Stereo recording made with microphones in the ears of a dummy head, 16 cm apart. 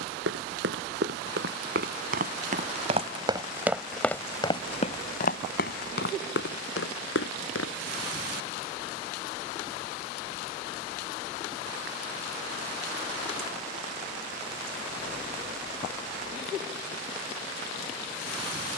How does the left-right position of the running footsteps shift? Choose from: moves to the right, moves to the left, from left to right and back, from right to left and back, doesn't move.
moves to the left.